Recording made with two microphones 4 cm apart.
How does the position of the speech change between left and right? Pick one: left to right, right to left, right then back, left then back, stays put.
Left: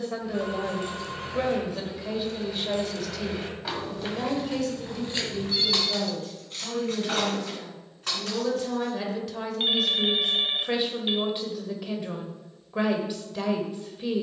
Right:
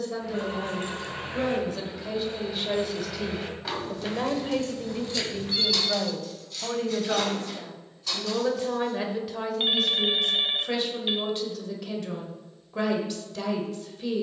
right then back.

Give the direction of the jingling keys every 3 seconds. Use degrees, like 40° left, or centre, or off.
40° right, 20° left, 50° left, off, off.